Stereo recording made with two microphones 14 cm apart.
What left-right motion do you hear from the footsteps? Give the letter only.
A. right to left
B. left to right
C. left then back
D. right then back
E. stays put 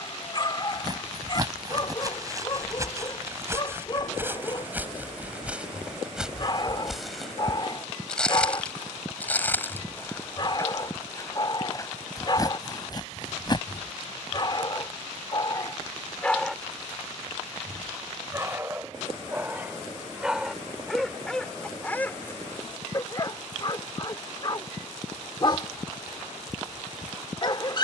A.